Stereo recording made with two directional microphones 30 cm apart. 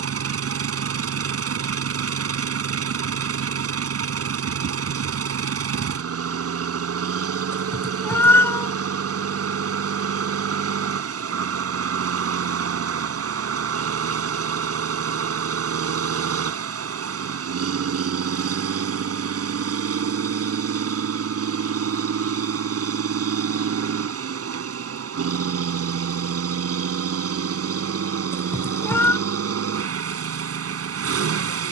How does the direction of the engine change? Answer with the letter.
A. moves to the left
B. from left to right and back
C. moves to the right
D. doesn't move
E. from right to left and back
D.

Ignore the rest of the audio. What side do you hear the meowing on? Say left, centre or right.
centre.